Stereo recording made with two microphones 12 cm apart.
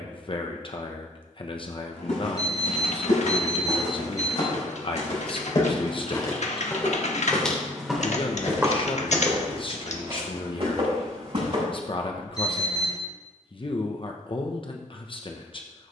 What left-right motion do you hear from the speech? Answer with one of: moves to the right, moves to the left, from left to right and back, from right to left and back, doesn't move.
doesn't move.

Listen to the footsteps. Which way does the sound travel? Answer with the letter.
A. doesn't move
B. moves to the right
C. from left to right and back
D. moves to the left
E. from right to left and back
B.